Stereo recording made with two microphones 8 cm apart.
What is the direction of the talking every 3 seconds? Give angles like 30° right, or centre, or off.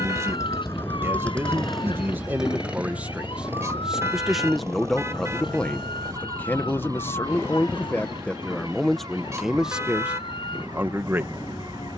30° right, centre, 20° left, 10° right.